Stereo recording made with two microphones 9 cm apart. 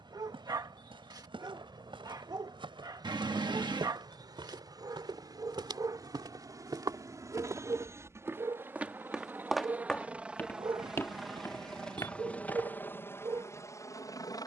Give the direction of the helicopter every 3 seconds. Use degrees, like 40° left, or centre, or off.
50° right, 50° right, 30° right, 10° right, 30° left.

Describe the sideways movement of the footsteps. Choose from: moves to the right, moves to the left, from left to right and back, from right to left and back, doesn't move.
moves to the left.